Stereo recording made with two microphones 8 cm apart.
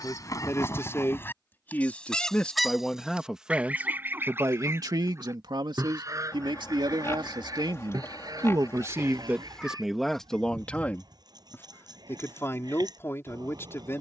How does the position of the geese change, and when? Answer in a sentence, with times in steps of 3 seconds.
In this clip you hear the geese on the left from 0 s and on the right from 3 s.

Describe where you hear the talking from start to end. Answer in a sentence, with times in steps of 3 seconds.
You can hear the talking on the left from 0 s, on the right from 3 s, in the centre from 9 s and on the left from 12 s.